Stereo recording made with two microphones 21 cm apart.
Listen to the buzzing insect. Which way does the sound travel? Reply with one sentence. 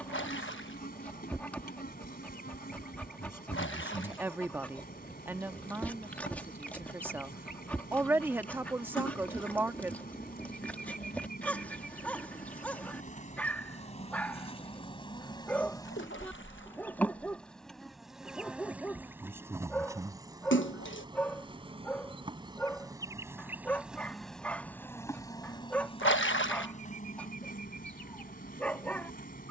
You can hear the buzzing insect move from left to right and back again.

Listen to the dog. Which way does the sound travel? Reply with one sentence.
In this clip you hear the dog stay in one place.